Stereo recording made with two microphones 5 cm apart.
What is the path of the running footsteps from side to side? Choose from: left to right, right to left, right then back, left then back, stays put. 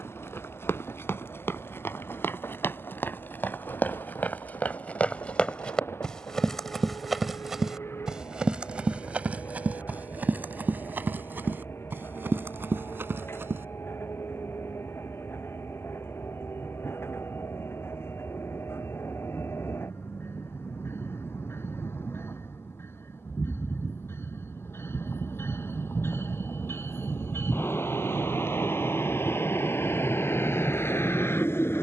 left to right.